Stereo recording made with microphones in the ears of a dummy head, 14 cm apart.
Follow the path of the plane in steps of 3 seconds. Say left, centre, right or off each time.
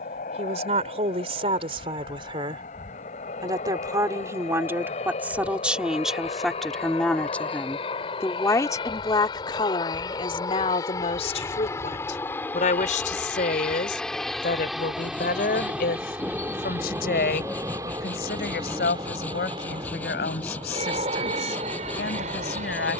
left, left, left, left, centre, centre, right, right.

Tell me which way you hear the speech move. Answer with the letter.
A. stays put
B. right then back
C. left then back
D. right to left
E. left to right
D.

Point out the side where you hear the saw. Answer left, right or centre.
centre.